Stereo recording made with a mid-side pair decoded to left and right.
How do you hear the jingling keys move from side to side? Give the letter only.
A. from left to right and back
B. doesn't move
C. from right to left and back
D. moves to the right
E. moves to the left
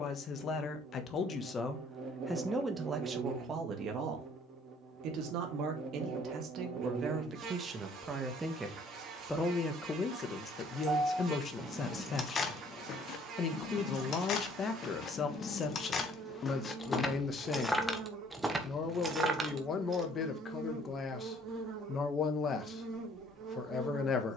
C.